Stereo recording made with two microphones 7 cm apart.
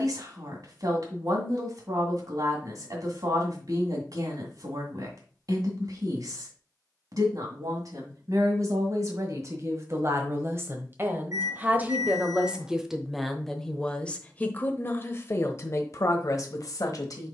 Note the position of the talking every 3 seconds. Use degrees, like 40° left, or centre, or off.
50° right, 50° right, 50° right, 30° right, 10° left, 50° left.